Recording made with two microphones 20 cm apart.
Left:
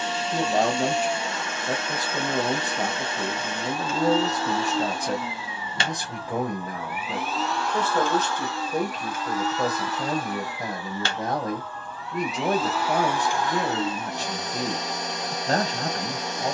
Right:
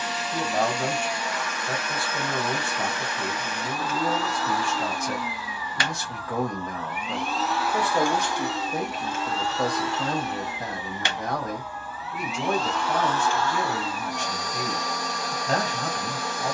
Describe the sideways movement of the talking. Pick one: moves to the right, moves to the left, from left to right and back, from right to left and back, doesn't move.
from left to right and back.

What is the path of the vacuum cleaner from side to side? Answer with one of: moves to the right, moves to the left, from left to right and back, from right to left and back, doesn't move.
from left to right and back.